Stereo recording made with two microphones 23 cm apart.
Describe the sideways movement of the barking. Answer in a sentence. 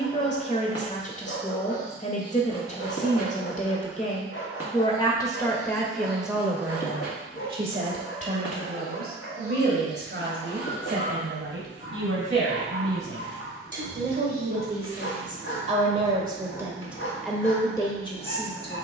You can hear the barking stay in one place.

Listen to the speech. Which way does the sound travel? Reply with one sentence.
In this clip you hear the speech go right and come back.